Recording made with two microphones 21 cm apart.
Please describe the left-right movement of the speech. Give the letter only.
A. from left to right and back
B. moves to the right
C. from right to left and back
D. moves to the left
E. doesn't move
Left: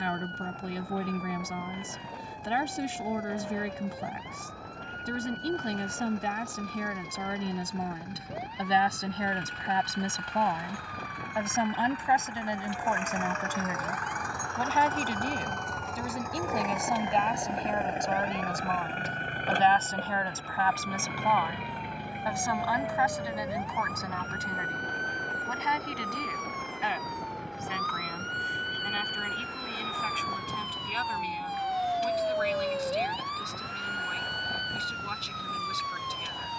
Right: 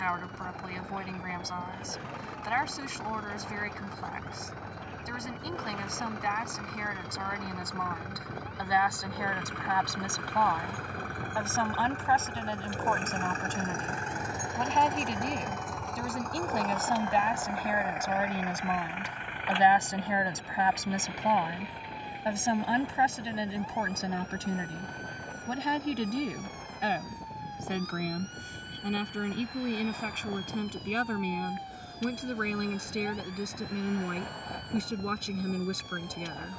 B.